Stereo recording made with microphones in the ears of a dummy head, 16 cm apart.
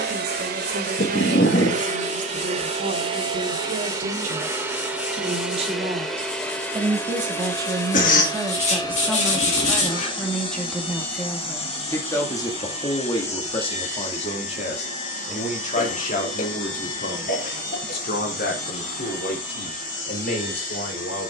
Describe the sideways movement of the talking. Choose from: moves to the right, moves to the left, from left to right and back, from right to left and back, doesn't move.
moves to the left.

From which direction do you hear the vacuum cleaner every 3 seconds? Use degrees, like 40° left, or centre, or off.
40° right, 10° right, 10° left, 30° left, 40° left, 40° left, 50° left.